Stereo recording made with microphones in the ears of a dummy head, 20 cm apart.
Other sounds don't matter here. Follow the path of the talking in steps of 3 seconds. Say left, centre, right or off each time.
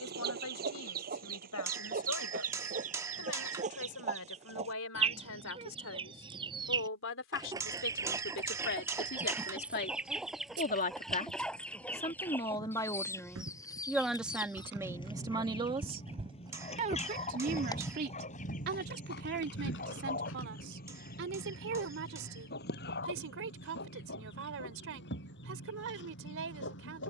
left, left, left, left, centre, right, right, right, right.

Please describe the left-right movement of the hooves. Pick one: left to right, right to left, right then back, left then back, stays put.
right to left.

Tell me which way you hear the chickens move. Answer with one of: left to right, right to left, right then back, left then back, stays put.
right to left.